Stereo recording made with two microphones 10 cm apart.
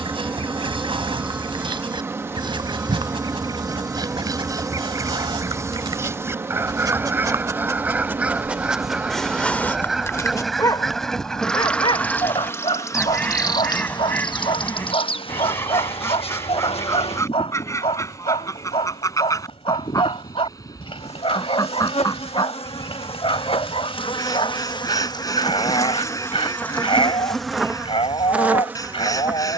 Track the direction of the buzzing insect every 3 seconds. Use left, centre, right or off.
right, right, right, centre, left, left, left, left, left, centre.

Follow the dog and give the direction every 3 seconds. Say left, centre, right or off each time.
right, right, right, left, left, left, left, left, left, left.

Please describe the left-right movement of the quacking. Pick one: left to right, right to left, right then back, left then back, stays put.
right to left.